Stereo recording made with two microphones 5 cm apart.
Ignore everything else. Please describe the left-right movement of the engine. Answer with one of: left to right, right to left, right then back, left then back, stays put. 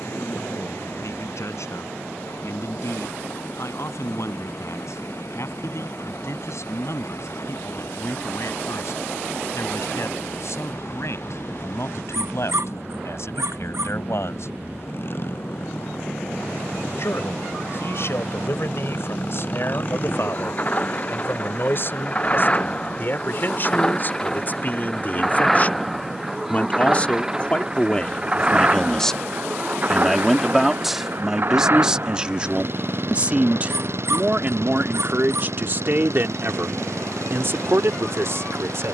left to right.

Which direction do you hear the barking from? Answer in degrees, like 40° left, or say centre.
70° right.